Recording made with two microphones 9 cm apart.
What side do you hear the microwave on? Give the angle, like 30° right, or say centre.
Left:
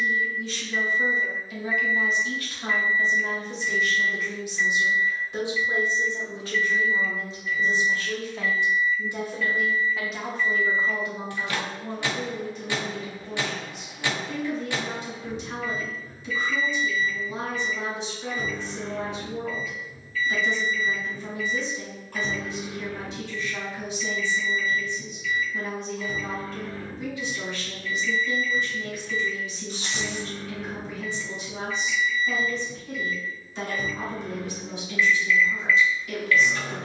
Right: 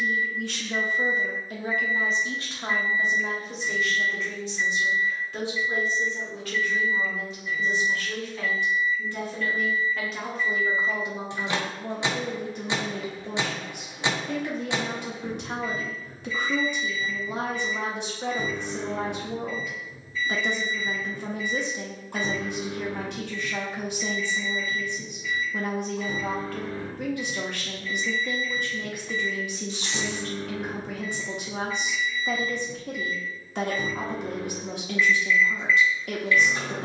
20° right.